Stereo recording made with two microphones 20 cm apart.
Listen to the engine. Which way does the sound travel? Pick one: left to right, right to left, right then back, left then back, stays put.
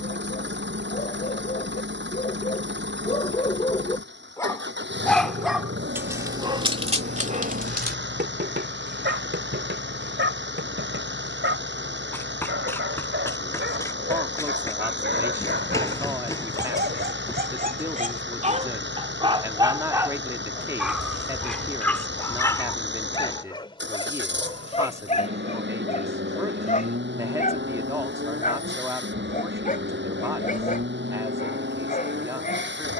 stays put.